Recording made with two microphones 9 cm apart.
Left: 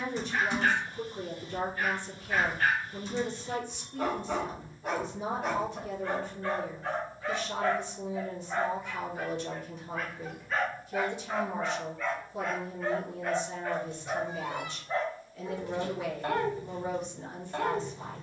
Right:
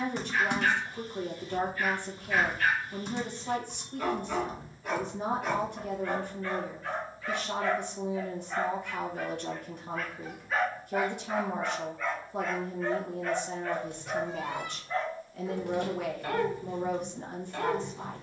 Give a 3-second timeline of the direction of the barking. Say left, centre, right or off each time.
left, left, left, centre, centre, left.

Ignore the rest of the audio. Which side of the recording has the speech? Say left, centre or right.
right.